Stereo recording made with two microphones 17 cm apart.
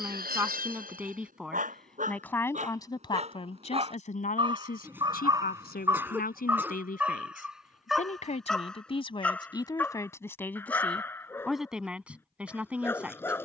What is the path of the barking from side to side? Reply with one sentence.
You can hear the barking travel towards the left.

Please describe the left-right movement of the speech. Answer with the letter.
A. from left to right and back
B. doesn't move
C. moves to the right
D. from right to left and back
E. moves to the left
D.